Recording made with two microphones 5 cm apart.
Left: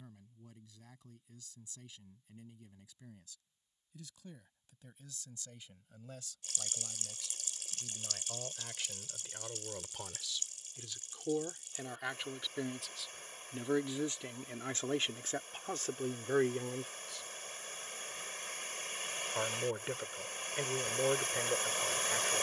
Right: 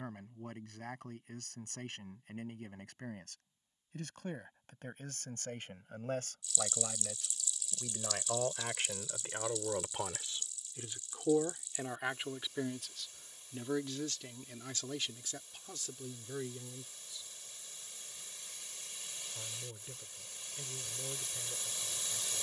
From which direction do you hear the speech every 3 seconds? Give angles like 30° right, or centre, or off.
60° right, 50° right, 40° right, 30° right, 10° left, 50° left, 70° left, 70° left.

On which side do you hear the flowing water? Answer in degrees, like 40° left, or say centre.
50° left.